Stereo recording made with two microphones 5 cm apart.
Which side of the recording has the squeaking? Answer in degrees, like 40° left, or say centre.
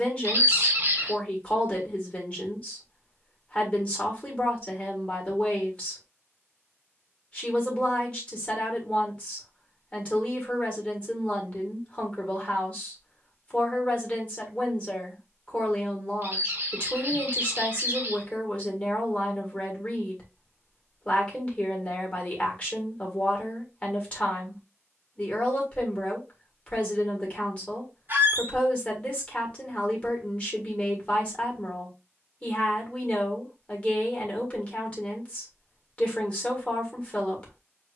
50° right.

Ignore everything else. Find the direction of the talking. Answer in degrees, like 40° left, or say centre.
30° left.